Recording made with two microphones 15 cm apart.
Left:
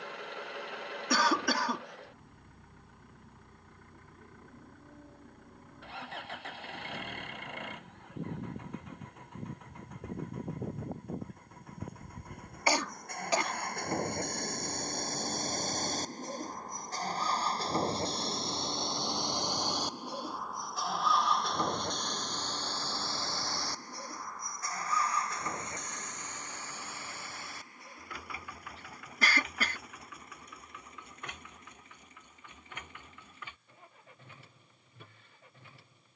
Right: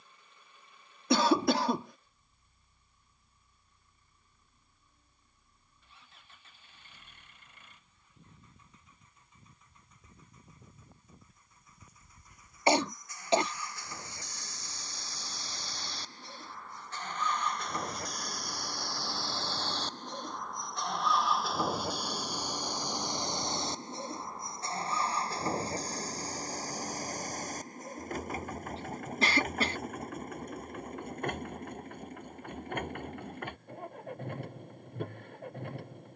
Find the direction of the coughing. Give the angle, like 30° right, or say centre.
30° right.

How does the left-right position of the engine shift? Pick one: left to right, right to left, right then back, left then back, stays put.
left to right.